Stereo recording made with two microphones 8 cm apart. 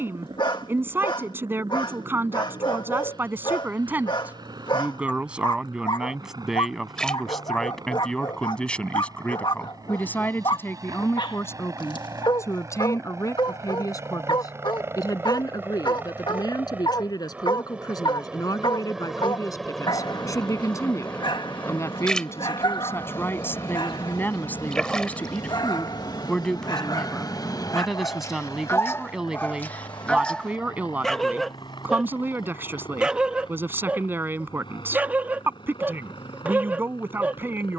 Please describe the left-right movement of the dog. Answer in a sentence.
You can hear the dog move from left to right.